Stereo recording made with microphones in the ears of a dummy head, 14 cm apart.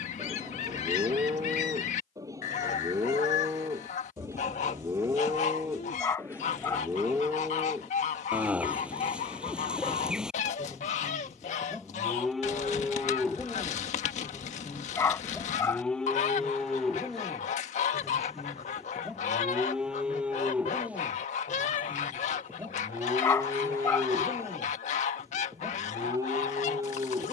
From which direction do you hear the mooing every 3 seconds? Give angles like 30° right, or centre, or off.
20° right, 20° right, 10° right, 10° right, centre, centre, 10° right, 10° right, 20° right.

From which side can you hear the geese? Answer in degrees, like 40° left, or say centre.
50° left.